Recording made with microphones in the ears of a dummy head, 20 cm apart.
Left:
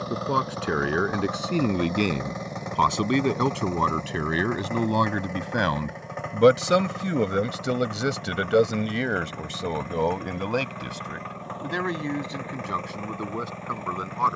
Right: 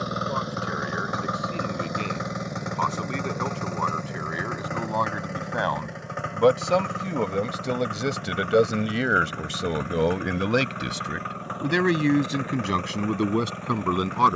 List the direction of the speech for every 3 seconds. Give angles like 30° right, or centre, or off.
60° left, 50° left, 10° left, 20° right, 50° right.